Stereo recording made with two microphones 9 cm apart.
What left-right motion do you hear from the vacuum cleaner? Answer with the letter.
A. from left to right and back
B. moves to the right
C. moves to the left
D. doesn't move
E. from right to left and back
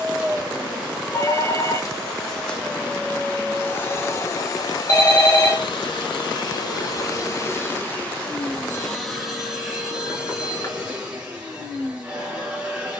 E.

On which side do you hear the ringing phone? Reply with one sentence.
In this clip you hear the ringing phone on the left.